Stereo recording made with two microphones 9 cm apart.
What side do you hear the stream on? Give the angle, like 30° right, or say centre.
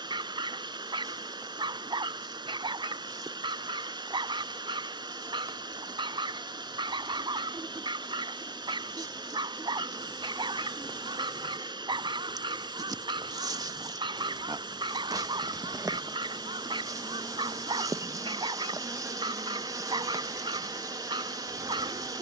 60° right.